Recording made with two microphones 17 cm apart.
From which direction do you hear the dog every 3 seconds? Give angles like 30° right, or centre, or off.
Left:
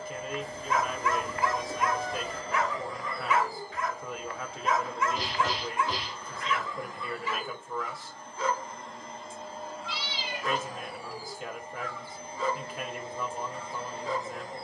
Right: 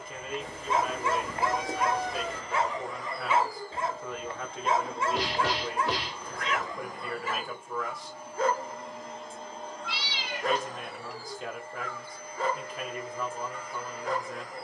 30° right, 30° right, 50° right, 60° right, 60° right.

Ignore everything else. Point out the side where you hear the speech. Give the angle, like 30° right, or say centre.
centre.